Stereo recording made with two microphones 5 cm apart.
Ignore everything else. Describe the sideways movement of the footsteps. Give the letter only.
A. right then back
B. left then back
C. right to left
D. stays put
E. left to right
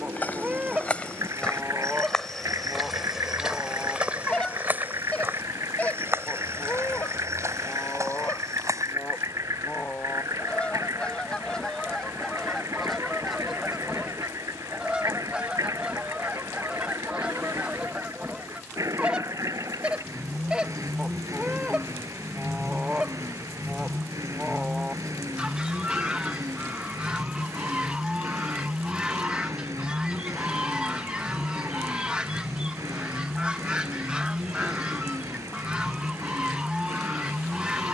E.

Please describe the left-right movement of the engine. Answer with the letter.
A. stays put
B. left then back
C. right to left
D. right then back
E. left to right
A.